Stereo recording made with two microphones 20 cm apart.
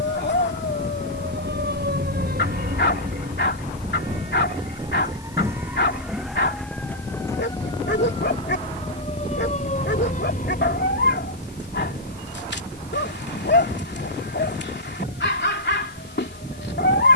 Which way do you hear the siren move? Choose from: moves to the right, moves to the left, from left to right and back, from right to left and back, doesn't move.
moves to the left.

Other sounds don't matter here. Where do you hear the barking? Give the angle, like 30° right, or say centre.
70° left.